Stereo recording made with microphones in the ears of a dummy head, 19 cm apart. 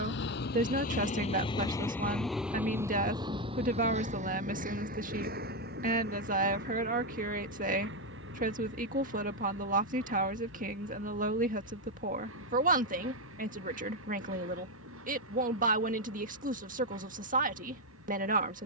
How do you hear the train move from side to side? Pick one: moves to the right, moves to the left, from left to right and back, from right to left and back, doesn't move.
moves to the right.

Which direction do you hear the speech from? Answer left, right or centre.
right.